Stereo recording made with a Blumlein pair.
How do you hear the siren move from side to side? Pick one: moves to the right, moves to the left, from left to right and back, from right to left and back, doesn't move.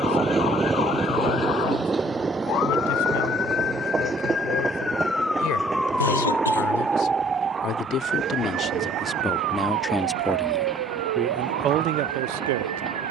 moves to the right.